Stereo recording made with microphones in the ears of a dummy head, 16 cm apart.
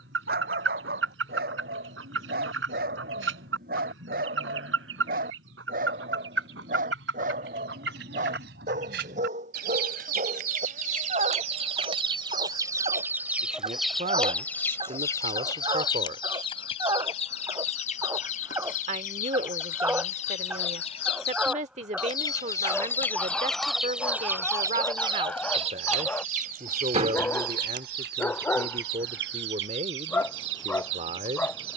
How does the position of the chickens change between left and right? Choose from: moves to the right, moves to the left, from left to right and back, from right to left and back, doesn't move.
from right to left and back.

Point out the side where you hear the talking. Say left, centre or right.
right.